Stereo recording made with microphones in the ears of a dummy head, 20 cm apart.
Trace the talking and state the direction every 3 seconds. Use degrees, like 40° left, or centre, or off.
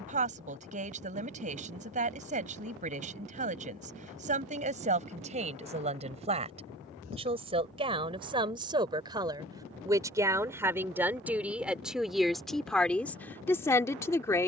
30° right, 30° right, 20° right, 10° right, 10° left.